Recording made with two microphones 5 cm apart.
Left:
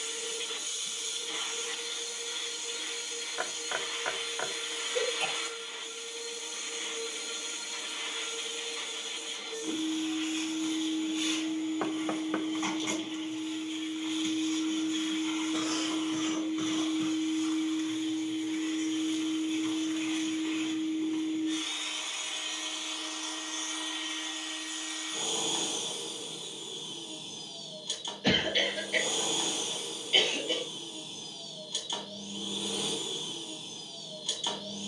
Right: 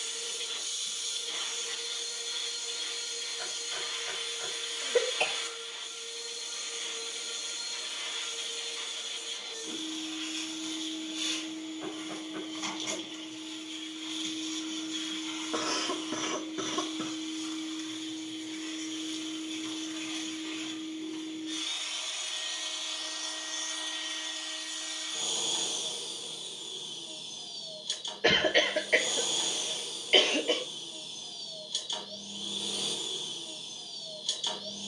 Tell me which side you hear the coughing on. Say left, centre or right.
right.